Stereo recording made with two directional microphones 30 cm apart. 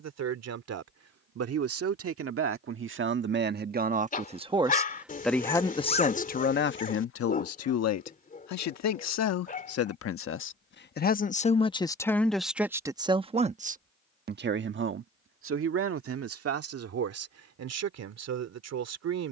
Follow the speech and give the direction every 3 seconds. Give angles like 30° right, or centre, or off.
50° right, 10° right, 50° left, 40° left, 20° right, 50° right, 60° right.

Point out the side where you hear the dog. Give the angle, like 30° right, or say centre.
30° left.